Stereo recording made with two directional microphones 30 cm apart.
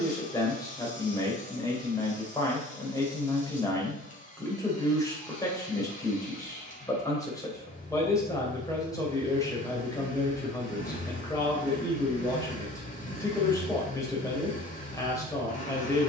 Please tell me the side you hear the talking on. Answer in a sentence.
In this clip you hear the talking in the centre.